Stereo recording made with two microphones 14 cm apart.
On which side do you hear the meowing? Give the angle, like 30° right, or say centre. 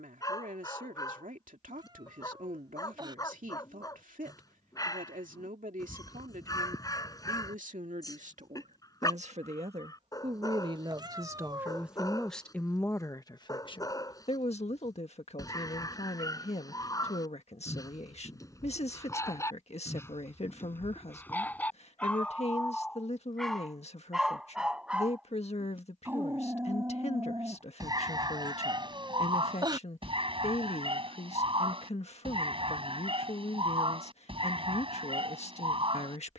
30° right.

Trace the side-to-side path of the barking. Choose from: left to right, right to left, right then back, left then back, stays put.
left to right.